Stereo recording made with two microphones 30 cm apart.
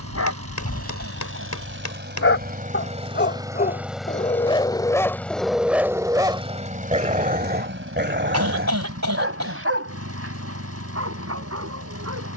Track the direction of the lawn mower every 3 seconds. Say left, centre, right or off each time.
right, centre, right, right.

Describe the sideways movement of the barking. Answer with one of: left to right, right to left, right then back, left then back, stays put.
left to right.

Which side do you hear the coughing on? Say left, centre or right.
right.